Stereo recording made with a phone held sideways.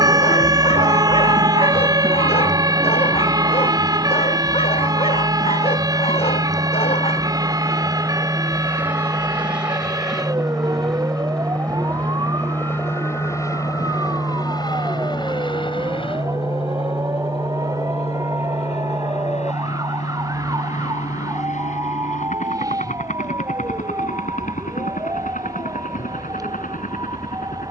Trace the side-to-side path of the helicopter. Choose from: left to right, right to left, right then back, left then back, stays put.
right to left.